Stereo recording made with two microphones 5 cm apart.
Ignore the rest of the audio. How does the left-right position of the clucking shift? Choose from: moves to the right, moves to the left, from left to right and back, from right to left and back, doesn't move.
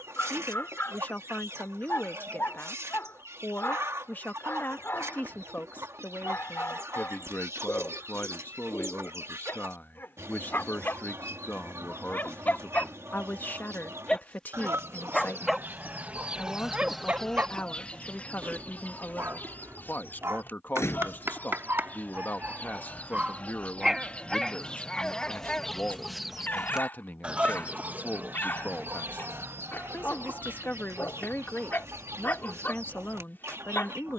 from right to left and back.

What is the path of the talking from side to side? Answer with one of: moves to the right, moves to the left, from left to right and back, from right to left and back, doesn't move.
doesn't move.